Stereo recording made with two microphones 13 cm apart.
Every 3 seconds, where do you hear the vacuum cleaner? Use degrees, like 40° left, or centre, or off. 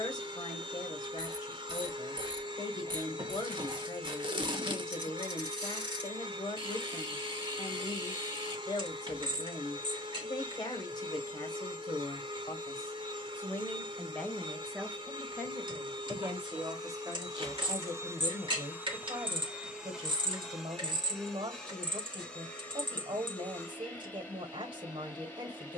30° right, 30° right, 30° right, 30° right, 30° right, 30° right, 10° right, 10° left, 10° left.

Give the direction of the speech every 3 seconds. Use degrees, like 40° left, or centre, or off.
30° left, 30° left, 30° left, 30° left, 20° left, 20° right, 30° right, 30° right, 30° right.